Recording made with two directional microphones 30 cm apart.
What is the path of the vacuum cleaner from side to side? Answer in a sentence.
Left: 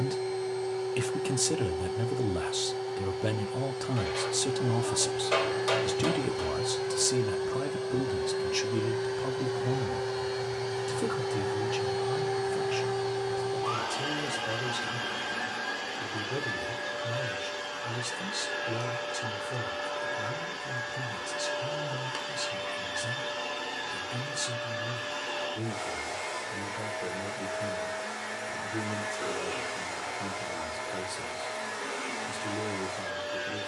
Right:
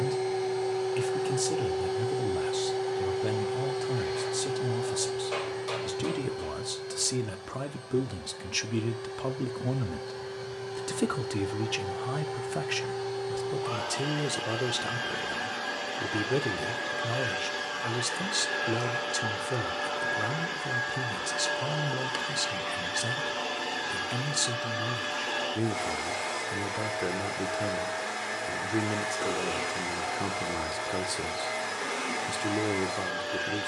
You can hear the vacuum cleaner go left and come back.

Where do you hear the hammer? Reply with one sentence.
In this clip you hear the hammer on the left.